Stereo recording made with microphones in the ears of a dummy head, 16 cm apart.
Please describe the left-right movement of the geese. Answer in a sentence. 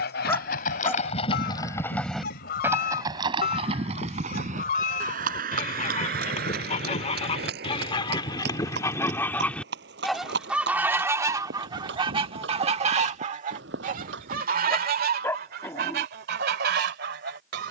In this clip you hear the geese go from the left side to the right.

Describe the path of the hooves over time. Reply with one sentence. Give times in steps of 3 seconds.
You can hear the hooves on the left from 0 s, on the right from 3 s and not at all from 15 s.